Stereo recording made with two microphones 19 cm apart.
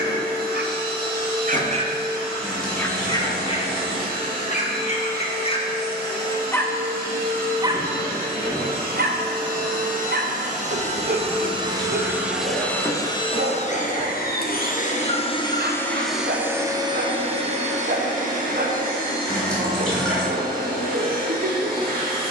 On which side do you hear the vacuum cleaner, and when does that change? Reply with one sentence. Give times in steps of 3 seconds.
In this clip you hear the vacuum cleaner on the right from 0 s, on the left from 12 s, in the centre from 15 s and on the right from 18 s.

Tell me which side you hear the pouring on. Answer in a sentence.
You can hear the pouring in the centre.